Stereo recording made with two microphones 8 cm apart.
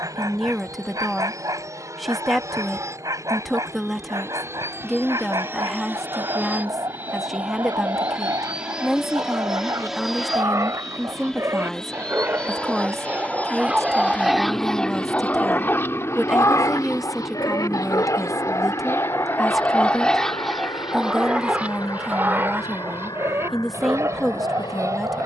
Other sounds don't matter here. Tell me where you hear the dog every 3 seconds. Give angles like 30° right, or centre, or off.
50° right, 50° right, 50° right, 40° right, 10° right, 40° left, 20° left, 30° right, 40° right.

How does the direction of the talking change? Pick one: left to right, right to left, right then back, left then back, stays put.
stays put.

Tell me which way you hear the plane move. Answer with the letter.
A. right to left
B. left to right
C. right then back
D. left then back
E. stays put
A.